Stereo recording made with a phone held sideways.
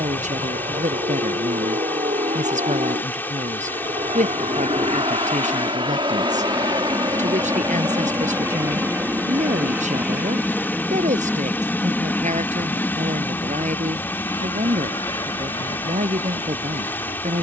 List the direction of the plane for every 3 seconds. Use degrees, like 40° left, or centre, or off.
50° right, 40° right, 30° right, 10° right, 20° left, 40° left.